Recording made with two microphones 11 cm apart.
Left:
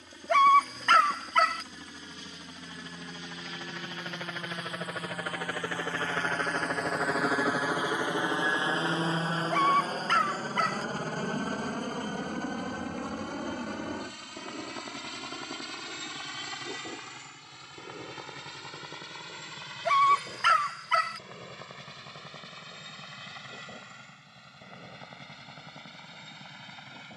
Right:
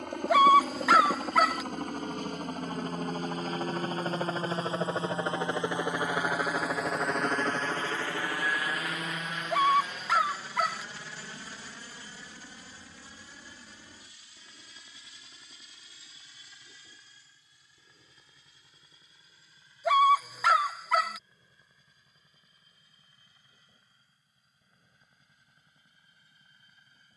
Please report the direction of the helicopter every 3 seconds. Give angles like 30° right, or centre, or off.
60° right, 30° right, 10° left, 40° left, 60° left, 70° left, 70° left, 80° left, 80° left.